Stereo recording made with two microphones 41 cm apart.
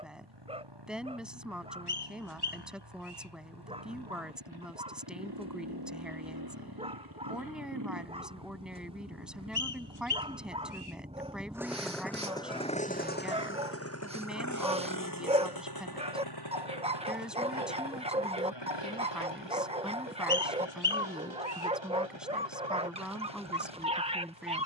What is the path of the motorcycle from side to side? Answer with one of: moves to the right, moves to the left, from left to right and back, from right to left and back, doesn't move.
moves to the left.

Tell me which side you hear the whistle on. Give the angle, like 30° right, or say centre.
60° left.